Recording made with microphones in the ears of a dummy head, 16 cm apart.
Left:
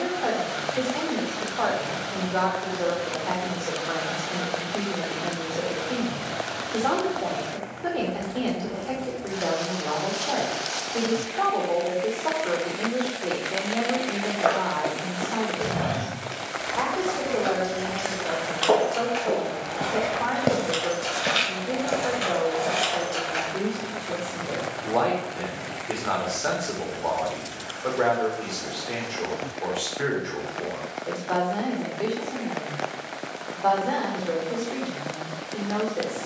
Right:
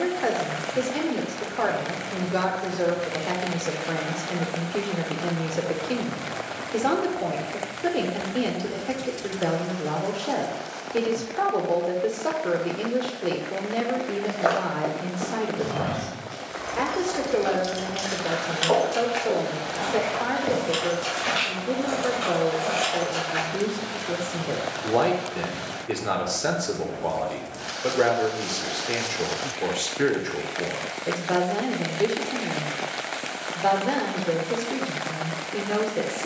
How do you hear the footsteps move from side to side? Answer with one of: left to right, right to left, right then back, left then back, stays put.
left then back.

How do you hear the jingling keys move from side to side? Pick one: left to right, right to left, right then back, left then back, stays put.
right to left.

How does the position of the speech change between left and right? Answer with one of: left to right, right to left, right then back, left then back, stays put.
stays put.